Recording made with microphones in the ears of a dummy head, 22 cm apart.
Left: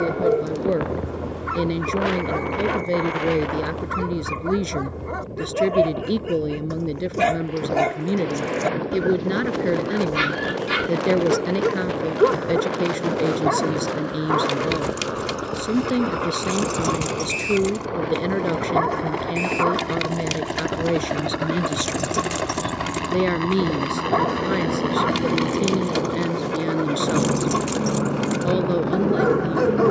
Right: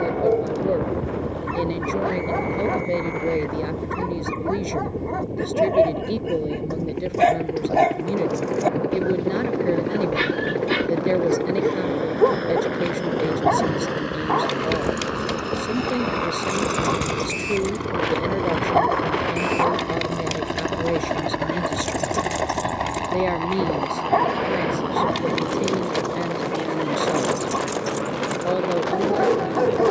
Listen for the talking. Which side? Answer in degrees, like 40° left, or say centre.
20° left.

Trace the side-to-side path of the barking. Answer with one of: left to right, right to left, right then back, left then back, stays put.
stays put.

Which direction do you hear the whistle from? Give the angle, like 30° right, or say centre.
centre.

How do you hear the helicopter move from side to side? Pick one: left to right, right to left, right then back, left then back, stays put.
right to left.